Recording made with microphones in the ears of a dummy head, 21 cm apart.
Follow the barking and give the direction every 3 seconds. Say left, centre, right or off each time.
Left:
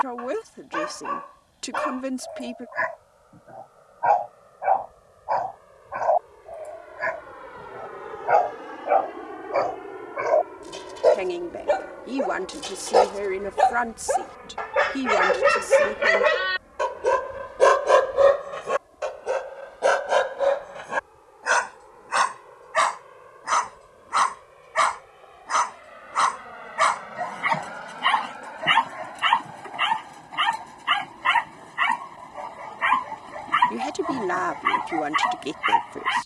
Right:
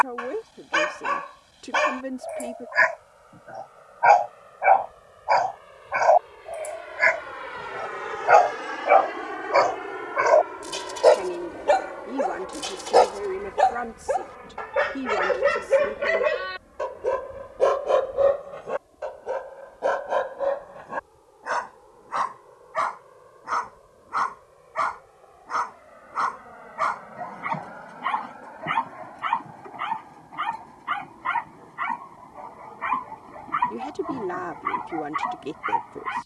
right, right, right, right, centre, left, left, left, left, left, left, left.